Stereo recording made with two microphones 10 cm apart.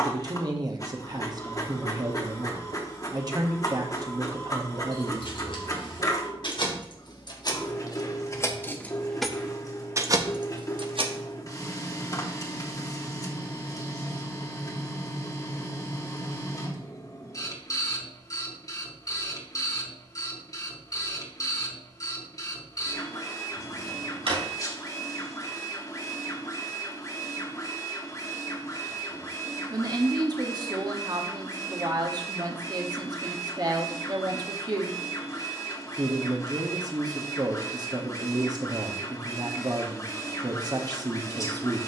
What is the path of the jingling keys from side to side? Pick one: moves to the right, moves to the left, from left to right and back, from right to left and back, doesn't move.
moves to the right.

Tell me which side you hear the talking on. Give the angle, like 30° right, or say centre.
40° right.